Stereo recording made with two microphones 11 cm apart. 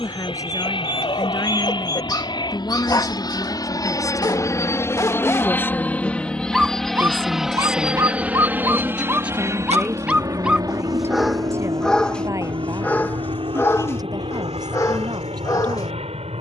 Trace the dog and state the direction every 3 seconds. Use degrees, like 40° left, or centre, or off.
40° left, 30° left, 20° right, 10° right, 20° left, 30° left.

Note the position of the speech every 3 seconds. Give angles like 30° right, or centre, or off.
30° left, 30° left, 10° left, 20° right, 30° right, 40° right.